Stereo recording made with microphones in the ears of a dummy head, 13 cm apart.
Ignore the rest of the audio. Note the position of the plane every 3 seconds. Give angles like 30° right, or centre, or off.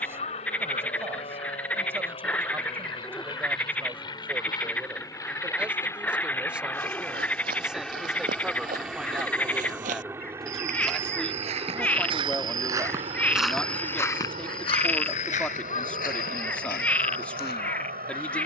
40° left, 30° left, 10° left, 20° right, 40° right, 50° right.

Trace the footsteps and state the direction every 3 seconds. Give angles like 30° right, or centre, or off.
off, off, 70° right, 50° right, centre, 60° left.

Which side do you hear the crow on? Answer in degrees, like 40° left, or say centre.
40° left.